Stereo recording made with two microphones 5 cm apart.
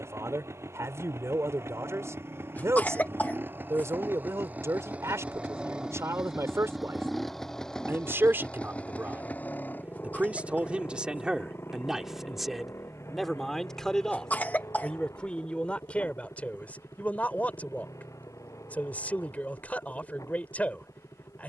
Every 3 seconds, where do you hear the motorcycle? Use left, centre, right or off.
right, right, centre, left, left, left, left.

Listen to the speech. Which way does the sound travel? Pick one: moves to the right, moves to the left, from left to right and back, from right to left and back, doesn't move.
moves to the left.